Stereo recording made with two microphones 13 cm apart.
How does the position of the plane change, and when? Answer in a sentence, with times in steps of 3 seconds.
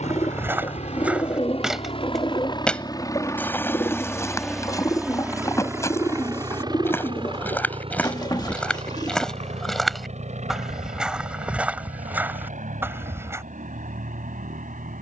In this clip you hear the plane on the left from 0 s, in the centre from 3 s and on the right from 6 s.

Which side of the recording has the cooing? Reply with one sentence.
You can hear the cooing on the left.